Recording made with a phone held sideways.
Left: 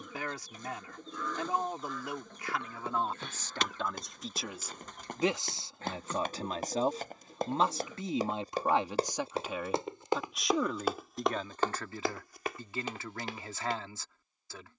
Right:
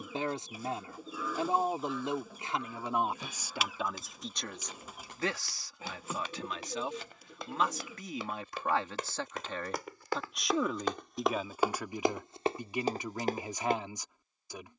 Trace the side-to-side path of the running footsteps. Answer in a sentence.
You can hear the running footsteps move from left to right.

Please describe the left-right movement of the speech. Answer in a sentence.
In this clip you hear the speech go left and come back.